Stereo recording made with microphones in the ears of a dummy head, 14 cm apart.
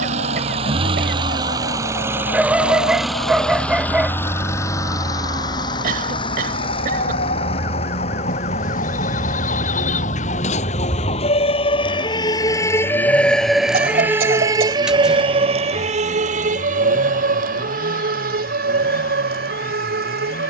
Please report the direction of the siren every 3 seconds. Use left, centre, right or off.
left, left, left, left, centre, right, right.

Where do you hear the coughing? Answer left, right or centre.
right.